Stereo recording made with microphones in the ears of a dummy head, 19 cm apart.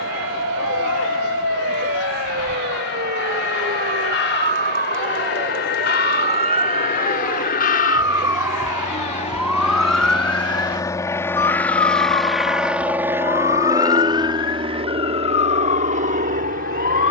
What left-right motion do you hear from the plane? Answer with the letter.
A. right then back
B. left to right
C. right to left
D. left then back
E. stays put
B.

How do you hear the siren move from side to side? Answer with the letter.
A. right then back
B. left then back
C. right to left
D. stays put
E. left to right
C.